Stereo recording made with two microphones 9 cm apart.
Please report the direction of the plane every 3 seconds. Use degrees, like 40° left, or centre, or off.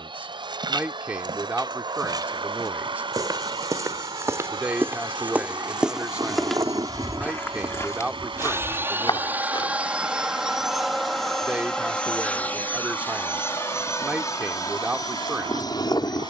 60° right, 50° right, 30° right, centre, 30° left, 40° left.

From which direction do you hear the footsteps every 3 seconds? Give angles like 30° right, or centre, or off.
50° right, 30° right, 20° left, 60° left, off, off.